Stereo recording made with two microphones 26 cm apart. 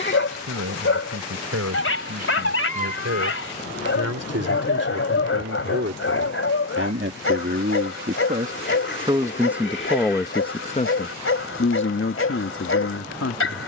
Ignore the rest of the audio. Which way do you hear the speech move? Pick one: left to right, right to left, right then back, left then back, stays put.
right to left.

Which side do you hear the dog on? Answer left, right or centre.
left.